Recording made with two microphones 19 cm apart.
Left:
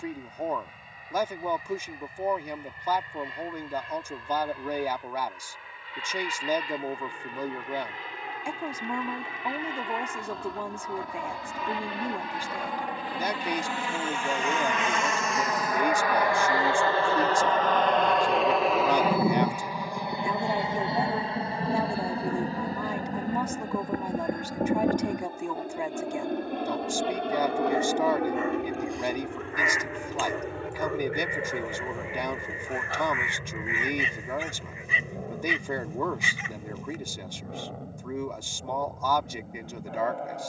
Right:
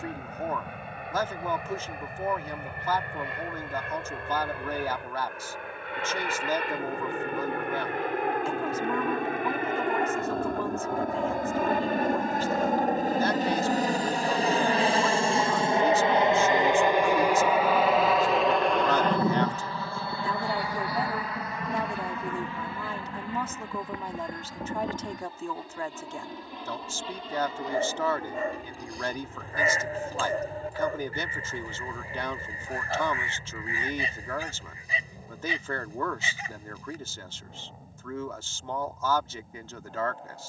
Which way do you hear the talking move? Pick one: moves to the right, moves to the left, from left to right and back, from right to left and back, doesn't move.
doesn't move.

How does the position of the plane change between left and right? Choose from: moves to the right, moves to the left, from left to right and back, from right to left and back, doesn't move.
moves to the left.